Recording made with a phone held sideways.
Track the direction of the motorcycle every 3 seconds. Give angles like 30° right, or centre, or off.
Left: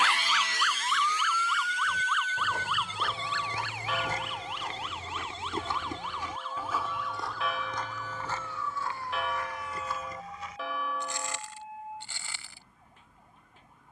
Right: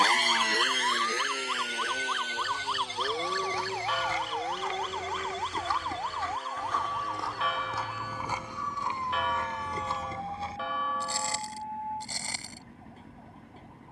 60° right, 70° right, 80° right, 80° right, 80° right.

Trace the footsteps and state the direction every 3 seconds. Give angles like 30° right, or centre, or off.
60° left, 40° left, centre, 30° right, 40° right.